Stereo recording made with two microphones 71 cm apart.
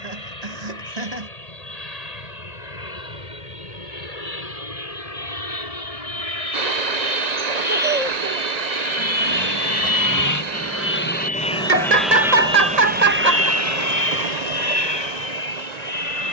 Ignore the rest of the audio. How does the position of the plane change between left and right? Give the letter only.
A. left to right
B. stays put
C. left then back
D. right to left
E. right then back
A.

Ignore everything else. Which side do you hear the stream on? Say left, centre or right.
right.